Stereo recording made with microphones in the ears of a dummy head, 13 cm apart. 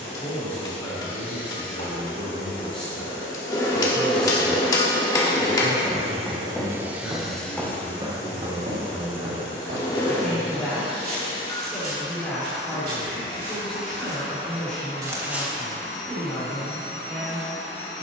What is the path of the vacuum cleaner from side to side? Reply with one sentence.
You can hear the vacuum cleaner move from left to right and back again.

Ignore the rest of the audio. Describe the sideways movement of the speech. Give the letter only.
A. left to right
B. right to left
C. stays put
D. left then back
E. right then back
C.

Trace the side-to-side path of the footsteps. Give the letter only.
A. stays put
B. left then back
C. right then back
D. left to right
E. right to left
C.